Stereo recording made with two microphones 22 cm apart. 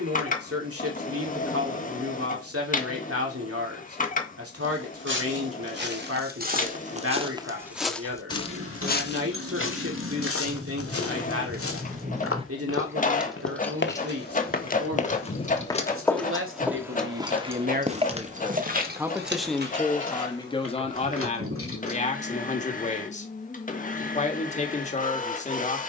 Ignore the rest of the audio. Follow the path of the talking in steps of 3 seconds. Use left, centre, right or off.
right, right, right, right, right, right, centre, left, left.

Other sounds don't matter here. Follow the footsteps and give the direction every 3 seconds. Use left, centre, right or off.
off, right, centre, left, left, centre, right, off, off.